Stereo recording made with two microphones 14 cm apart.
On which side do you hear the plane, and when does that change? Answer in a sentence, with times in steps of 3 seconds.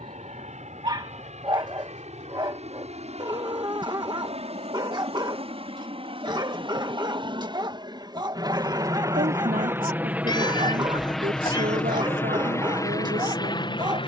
You can hear the plane on the right from 0 s, in the centre from 9 s and on the left from 12 s.